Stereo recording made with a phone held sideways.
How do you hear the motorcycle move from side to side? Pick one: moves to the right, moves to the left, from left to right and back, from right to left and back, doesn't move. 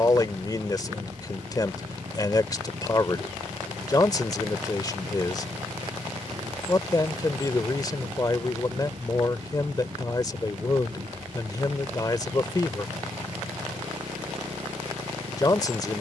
doesn't move.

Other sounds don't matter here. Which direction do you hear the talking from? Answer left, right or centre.
left.